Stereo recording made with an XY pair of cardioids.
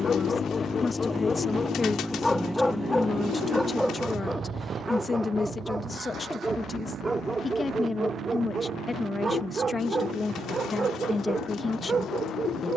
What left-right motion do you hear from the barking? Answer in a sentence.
You can hear the barking move to the right.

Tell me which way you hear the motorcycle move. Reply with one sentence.
You can hear the motorcycle move from left to right.